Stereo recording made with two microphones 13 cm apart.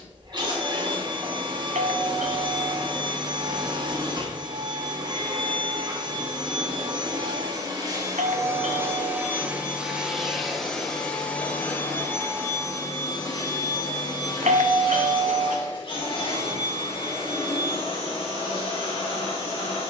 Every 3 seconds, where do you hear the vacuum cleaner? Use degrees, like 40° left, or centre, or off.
40° right, 40° right, 30° right, centre, 30° left, 50° left, 50° left.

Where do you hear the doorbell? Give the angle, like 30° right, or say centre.
70° right.